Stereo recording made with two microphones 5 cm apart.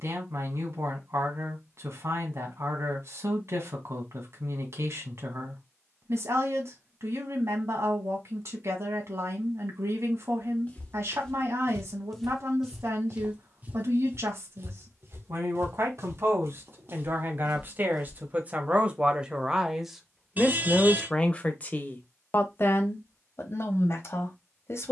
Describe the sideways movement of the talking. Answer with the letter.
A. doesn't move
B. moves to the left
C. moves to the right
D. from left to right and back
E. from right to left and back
B.